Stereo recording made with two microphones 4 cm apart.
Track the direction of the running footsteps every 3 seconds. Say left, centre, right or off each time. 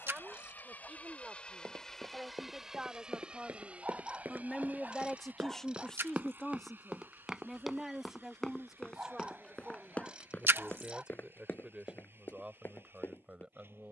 right, right, centre, left, left.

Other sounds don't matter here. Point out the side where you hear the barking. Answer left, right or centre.
right.